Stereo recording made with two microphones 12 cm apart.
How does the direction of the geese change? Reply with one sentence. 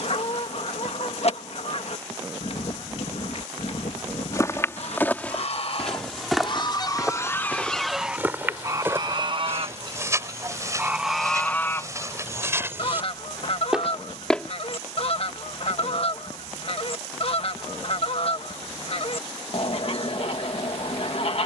You can hear the geese move from left to right and back again.